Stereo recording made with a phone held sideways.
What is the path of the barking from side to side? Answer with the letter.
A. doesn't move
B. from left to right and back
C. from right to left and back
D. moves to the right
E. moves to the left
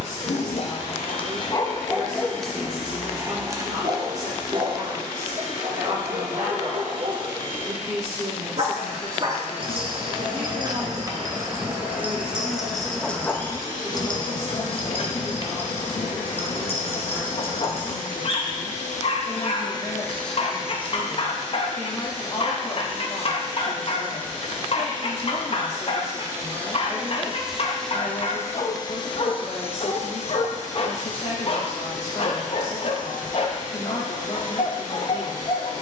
B.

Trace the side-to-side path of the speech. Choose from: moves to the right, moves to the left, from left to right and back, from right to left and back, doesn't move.
moves to the left.